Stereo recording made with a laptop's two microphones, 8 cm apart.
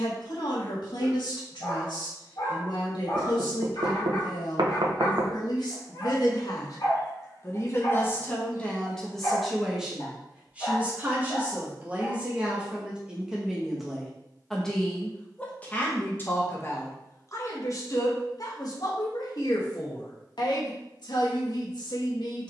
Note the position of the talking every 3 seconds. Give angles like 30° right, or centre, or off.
80° left, 70° left, 30° left, 10° right, 10° right, 30° left, 60° left, 70° left.